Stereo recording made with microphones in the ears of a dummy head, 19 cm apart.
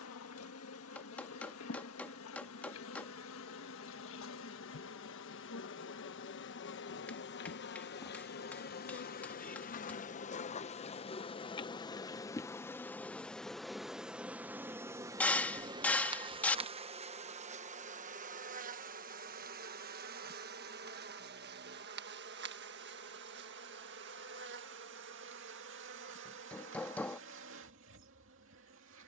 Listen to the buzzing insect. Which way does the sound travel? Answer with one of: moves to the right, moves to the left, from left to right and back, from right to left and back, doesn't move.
moves to the right.